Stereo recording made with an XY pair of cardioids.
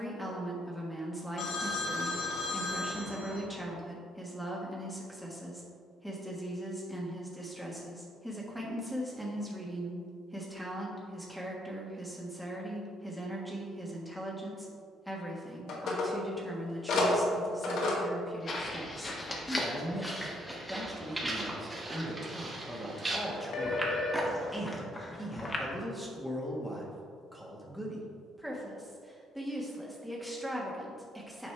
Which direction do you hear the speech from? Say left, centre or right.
centre.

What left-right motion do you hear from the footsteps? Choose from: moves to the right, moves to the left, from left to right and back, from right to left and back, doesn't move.
from left to right and back.